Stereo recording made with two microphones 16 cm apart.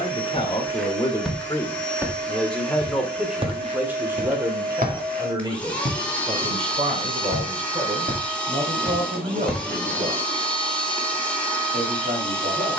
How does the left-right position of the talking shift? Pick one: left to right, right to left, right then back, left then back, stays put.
left to right.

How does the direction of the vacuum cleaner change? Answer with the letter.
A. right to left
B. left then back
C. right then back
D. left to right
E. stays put
E.